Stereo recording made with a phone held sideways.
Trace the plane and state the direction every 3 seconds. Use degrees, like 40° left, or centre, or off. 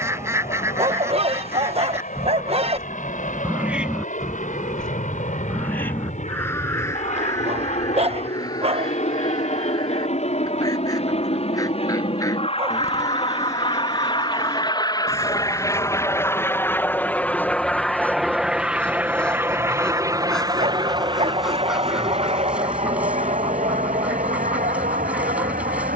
60° left, 60° left, 50° left, 50° left, 30° left, 10° left, 10° right, 40° right, 50° right.